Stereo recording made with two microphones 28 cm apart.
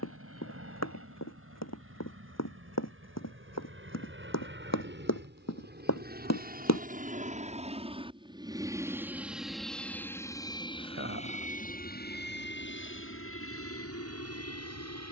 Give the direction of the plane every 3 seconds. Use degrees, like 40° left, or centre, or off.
60° right, 50° right, 20° right, 10° left, 50° left.